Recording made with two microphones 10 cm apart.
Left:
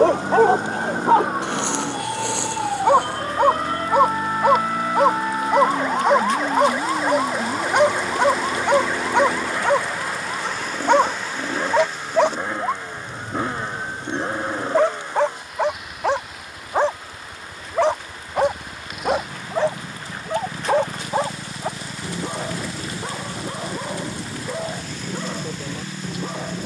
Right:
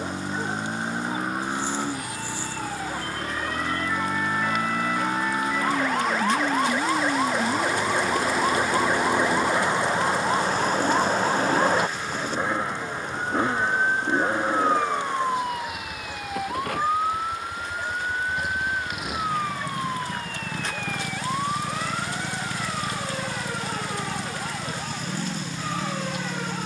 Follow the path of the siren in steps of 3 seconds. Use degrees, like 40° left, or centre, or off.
50° left, 30° left, centre, 30° right, 50° right, 60° right, 70° right, 80° right, 80° right.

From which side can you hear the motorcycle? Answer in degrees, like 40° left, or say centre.
centre.